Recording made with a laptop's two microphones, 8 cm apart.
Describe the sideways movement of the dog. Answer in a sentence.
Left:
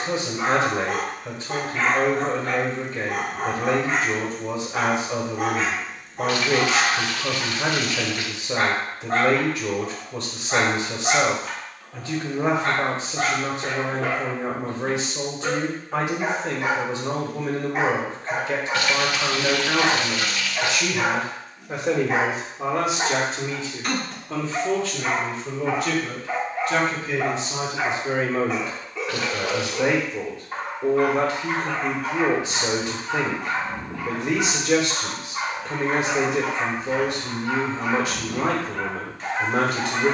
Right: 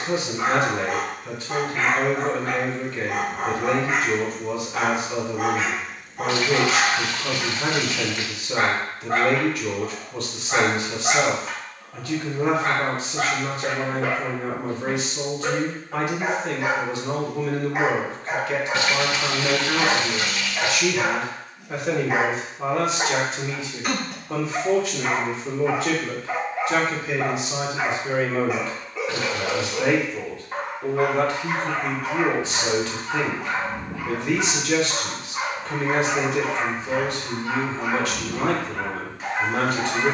You can hear the dog stay in one place.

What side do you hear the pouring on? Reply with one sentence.
In this clip you hear the pouring on the right.